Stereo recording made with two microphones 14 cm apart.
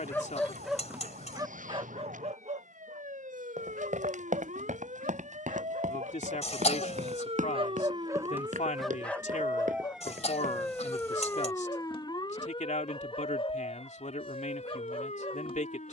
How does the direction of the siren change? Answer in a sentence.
You can hear the siren move to the left.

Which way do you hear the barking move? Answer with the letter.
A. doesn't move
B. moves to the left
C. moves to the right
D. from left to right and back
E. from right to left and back
D.